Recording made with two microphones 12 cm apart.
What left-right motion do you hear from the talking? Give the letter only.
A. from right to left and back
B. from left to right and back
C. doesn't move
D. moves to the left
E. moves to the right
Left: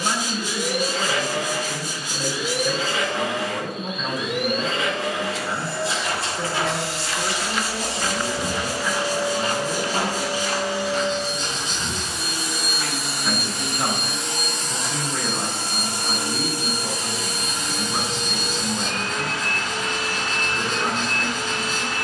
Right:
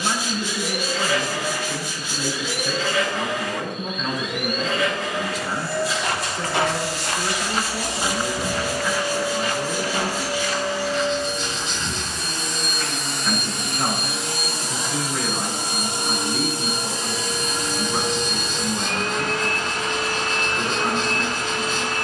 C.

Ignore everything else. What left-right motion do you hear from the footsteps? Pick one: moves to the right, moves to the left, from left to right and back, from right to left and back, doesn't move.
moves to the left.